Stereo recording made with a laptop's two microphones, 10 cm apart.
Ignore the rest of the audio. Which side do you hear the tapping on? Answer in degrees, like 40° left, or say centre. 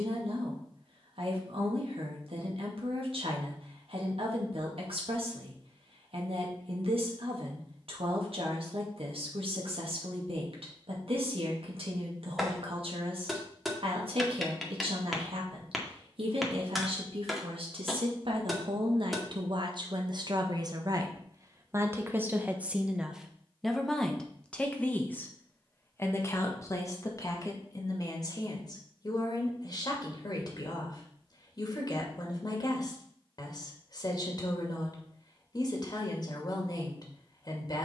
centre.